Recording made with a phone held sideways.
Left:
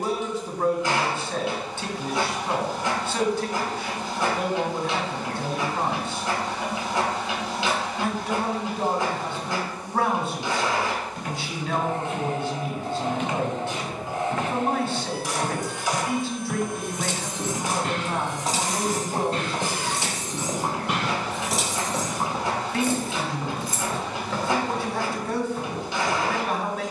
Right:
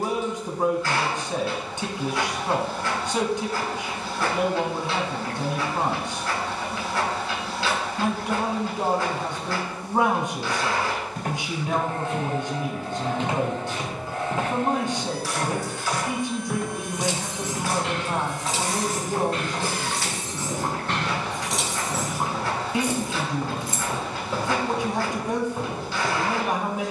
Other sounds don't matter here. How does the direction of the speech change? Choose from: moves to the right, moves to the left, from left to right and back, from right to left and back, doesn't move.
doesn't move.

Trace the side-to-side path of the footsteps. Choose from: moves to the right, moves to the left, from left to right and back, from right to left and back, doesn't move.
from right to left and back.